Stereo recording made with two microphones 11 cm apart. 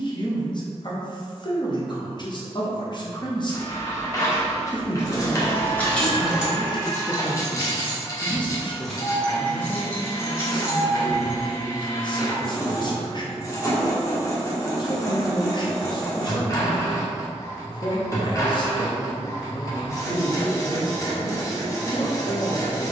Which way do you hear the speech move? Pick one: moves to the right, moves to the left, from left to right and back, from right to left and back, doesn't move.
doesn't move.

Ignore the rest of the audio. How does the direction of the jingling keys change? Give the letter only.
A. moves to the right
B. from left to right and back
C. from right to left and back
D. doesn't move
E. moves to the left
B.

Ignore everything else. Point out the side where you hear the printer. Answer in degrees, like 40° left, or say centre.
30° left.